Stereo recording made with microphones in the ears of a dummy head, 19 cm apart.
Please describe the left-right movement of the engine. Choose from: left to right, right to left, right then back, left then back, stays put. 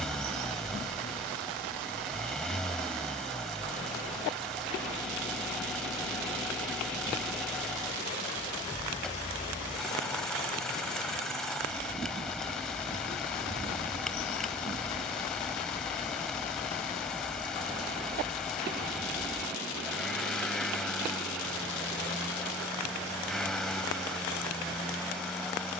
stays put.